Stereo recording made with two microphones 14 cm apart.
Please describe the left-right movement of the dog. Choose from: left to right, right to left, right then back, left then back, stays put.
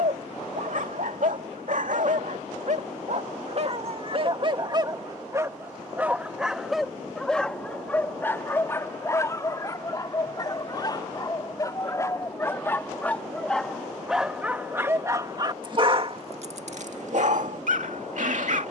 left then back.